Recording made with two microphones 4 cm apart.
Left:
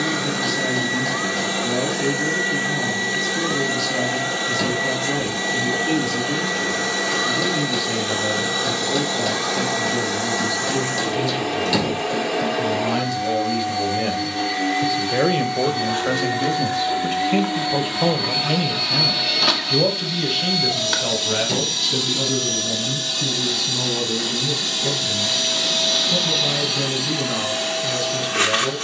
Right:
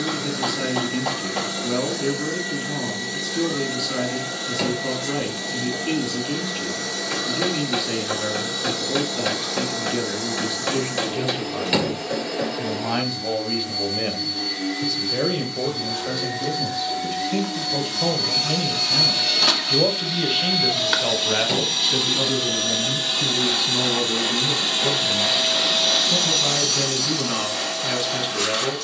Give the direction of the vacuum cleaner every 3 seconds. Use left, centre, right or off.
left, left, left, left, left, left, centre, right, centre, left.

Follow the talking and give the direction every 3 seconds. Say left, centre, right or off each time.
right, right, right, right, centre, left, centre, right, right, right.